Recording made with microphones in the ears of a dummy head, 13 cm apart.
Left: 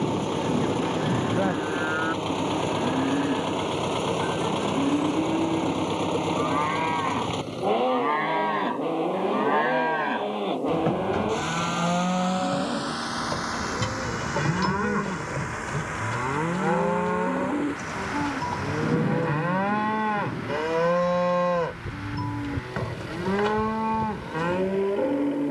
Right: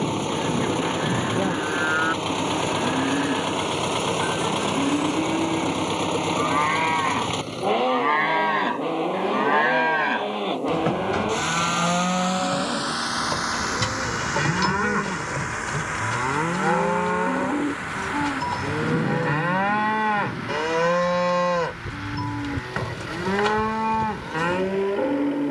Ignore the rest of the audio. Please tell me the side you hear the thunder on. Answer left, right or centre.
left.